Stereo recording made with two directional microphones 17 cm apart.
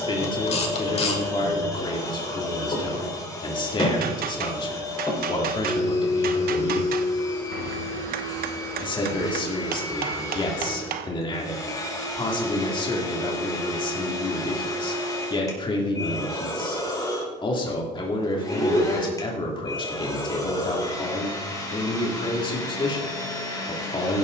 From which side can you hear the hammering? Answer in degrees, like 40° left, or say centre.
60° right.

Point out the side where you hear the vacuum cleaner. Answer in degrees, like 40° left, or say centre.
20° left.